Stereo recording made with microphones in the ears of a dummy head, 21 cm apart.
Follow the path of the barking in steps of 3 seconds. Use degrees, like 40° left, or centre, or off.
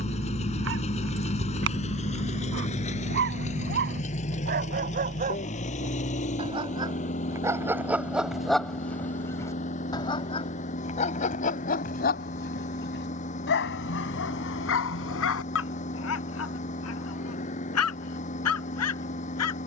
50° right, 40° right, 10° right, 30° left, 50° left, 60° left, 70° left.